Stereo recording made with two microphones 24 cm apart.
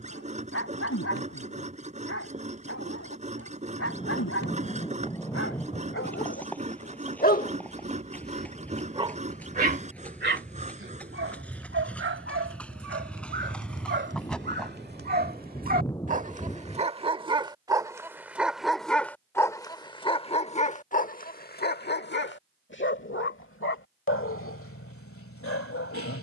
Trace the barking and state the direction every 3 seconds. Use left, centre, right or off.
left, left, left, right, right, right, centre, left, left.